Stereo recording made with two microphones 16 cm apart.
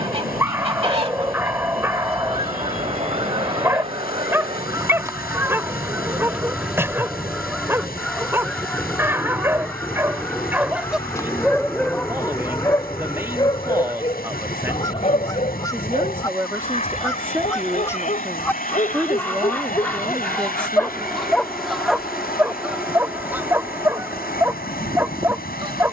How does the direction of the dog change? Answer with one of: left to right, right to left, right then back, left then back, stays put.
left then back.